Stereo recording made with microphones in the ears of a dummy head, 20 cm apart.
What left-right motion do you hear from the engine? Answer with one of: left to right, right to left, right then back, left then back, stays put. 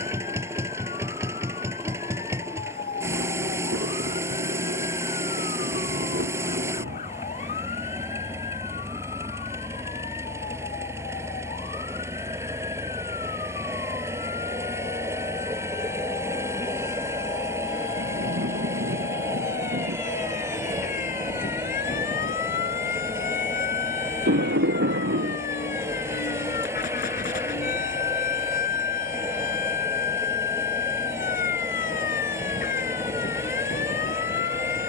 stays put.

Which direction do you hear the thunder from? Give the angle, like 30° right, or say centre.
50° right.